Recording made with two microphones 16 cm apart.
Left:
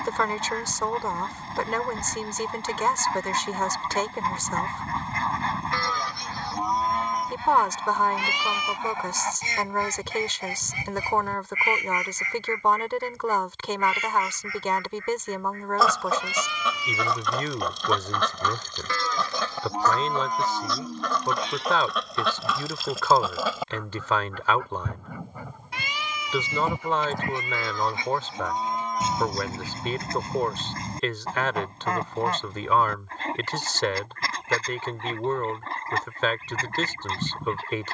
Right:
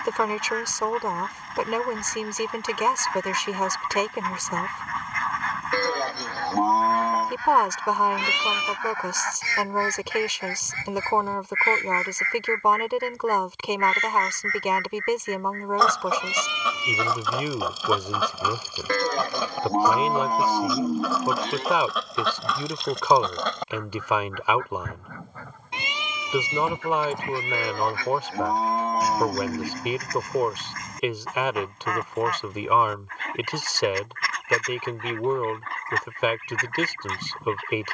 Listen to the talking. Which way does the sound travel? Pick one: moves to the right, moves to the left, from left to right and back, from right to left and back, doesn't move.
doesn't move.